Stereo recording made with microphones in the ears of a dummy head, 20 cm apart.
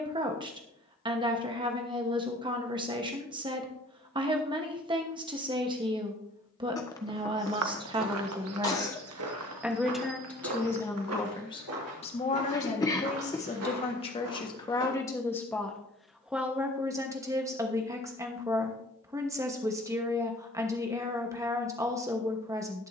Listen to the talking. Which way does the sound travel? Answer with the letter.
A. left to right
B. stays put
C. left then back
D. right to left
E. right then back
C.